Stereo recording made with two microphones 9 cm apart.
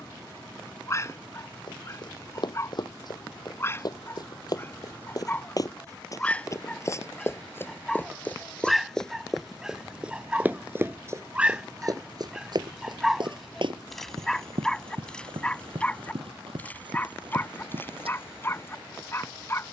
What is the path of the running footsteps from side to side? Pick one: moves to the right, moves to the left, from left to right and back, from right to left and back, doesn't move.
moves to the right.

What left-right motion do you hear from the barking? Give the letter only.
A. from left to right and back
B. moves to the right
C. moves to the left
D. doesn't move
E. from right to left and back
A.